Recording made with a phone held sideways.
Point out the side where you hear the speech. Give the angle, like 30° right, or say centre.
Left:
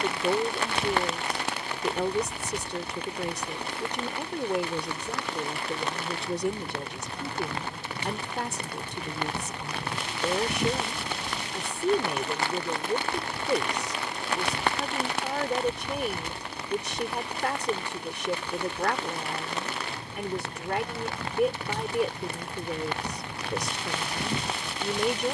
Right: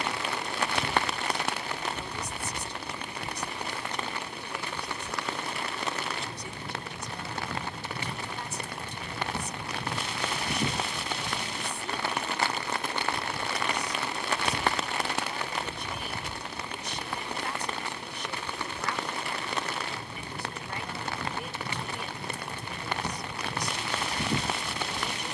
70° left.